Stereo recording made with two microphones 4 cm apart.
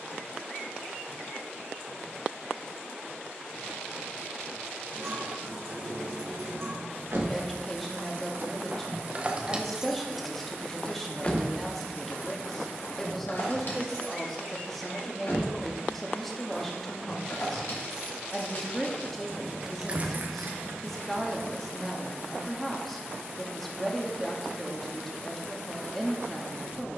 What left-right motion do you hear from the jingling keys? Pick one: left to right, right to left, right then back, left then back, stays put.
left then back.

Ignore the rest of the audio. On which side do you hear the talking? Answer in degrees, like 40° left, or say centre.
10° left.